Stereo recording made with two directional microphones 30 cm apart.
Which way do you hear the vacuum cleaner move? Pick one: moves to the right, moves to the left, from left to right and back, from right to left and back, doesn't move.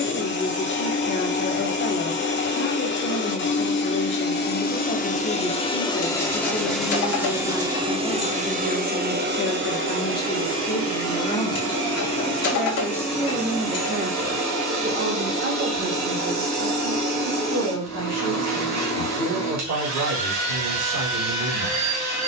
moves to the right.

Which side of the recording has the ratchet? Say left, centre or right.
left.